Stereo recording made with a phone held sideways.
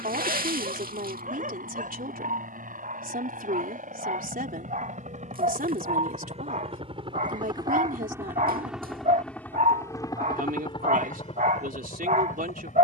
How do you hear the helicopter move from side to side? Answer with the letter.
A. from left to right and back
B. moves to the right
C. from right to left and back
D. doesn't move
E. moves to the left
E.